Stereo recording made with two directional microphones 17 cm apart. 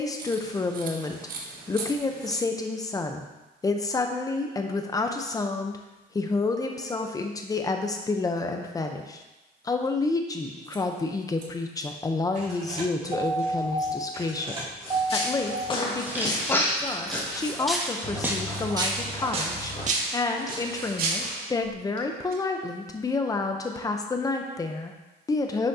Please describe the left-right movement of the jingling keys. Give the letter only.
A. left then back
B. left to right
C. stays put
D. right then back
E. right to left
E.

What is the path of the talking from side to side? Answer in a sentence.
You can hear the talking stay put.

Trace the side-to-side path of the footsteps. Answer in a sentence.
You can hear the footsteps travel towards the right.